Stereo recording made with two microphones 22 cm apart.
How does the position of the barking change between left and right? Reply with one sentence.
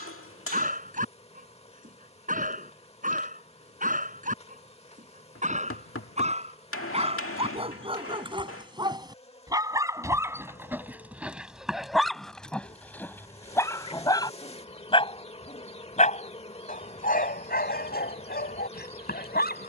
You can hear the barking go from the right side to the left.